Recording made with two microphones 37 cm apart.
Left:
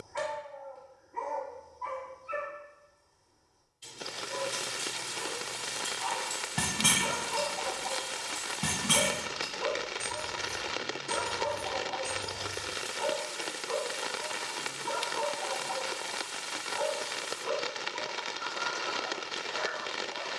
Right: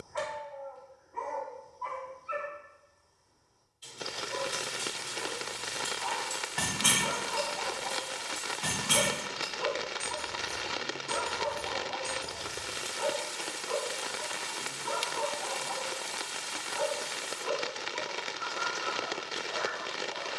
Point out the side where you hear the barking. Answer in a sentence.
In this clip you hear the barking on the left.